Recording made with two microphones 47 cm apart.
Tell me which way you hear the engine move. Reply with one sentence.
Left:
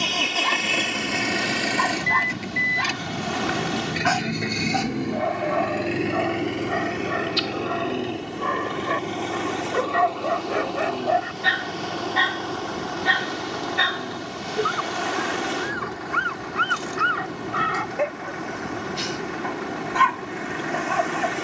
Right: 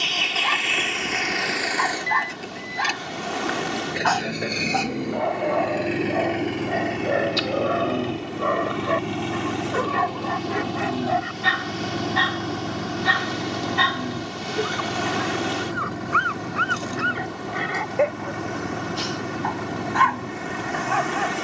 You can hear the engine travel towards the right.